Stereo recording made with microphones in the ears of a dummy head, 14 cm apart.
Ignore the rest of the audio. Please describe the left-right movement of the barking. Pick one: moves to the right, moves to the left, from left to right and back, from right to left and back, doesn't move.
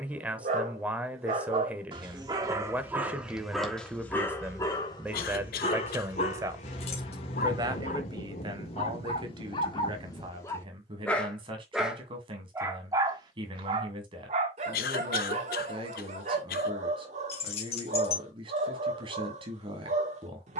from right to left and back.